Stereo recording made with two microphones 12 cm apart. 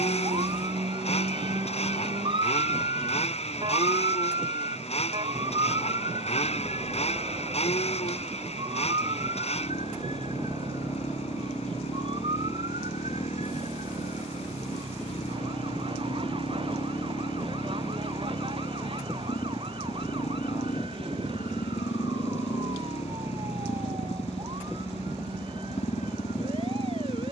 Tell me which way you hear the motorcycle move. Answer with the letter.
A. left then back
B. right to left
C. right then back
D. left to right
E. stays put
E.